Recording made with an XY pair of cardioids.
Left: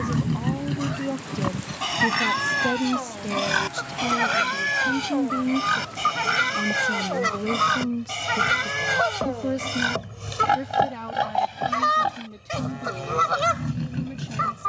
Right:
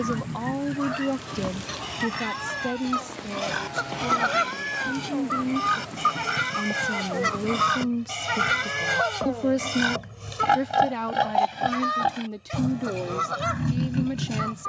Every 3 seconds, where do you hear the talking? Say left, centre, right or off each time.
centre, left, centre, right, right.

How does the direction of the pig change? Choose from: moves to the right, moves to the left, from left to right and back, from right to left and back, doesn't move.
moves to the right.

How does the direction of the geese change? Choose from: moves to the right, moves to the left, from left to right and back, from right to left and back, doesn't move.
moves to the left.